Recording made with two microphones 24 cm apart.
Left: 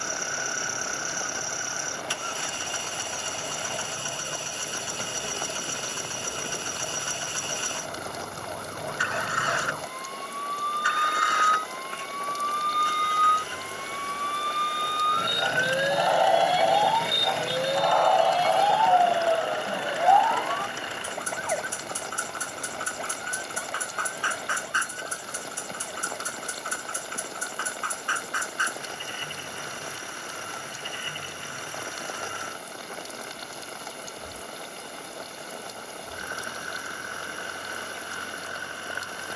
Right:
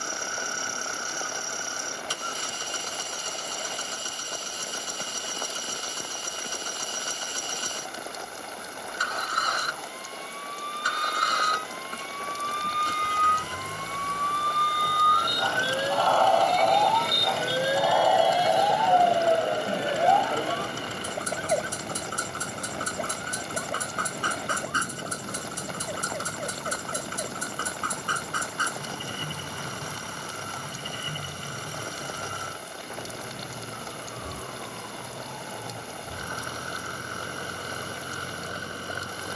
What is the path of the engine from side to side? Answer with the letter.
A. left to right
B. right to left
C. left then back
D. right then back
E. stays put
E.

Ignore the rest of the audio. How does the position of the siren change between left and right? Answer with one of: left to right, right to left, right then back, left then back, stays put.
left to right.